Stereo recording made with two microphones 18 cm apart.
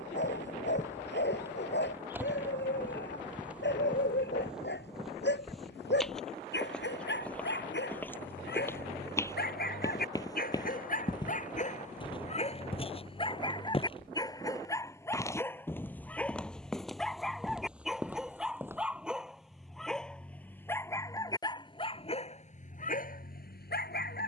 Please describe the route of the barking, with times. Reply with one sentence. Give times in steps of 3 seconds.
In this clip you hear the barking on the left from 0 s, in the centre from 15 s and on the left from 21 s.